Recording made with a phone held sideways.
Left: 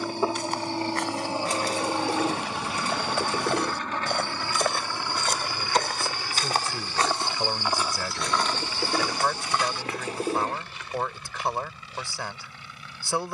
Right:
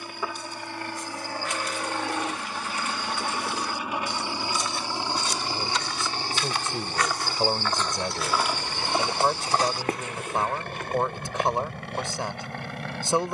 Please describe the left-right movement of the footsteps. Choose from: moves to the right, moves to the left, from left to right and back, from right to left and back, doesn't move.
moves to the right.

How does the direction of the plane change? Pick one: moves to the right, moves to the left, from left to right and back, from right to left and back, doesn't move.
moves to the right.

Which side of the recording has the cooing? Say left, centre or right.
left.